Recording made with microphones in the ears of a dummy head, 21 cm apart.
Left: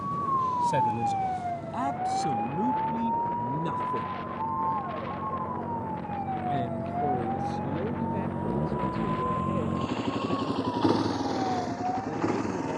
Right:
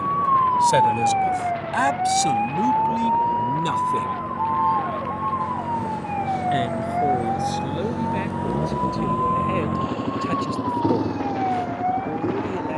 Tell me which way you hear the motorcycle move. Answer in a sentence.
You can hear the motorcycle move to the left.